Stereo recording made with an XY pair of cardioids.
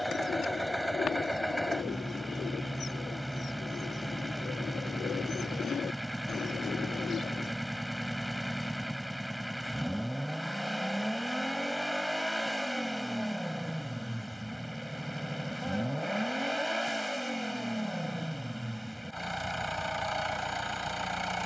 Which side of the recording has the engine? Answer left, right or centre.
centre.